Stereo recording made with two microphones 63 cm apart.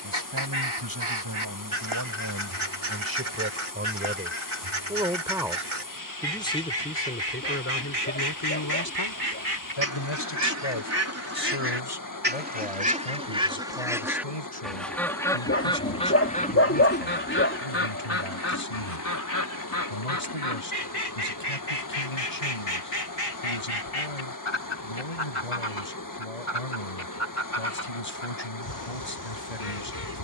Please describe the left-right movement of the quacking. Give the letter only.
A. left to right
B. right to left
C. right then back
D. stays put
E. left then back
B.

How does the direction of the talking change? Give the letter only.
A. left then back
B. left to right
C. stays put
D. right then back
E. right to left
E.